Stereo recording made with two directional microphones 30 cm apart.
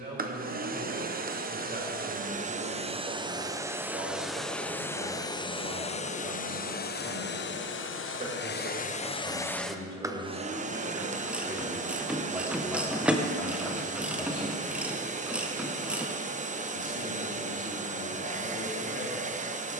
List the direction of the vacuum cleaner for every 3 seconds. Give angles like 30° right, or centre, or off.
30° right, centre, 30° left, 10° right, 20° right, 20° right, 20° right.